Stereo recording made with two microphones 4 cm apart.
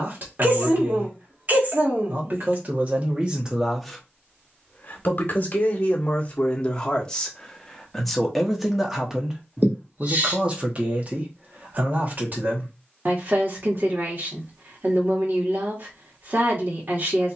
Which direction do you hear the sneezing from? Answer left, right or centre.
right.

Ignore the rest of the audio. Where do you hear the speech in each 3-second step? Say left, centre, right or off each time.
right, centre, centre, right, right, right.